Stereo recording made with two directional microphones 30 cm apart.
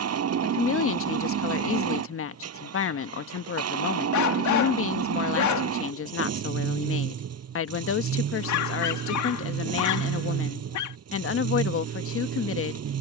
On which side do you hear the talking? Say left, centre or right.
left.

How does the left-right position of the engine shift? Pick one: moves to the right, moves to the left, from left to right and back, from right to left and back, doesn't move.
doesn't move.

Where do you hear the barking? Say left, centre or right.
left.